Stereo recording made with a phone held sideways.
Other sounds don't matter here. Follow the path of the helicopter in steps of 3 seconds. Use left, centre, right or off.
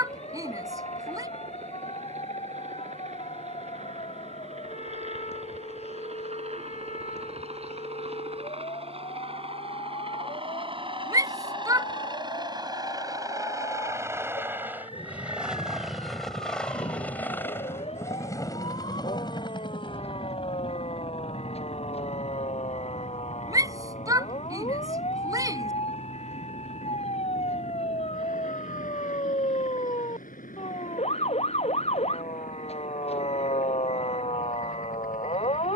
right, right, right, right, right, centre, left, left, left, left, left, left.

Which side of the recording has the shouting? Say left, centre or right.
right.